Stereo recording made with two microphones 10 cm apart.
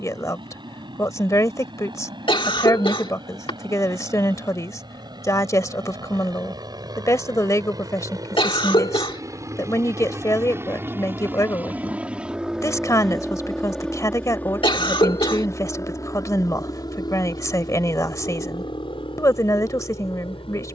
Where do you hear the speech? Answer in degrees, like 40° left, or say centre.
30° left.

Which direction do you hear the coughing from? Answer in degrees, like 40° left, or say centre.
60° left.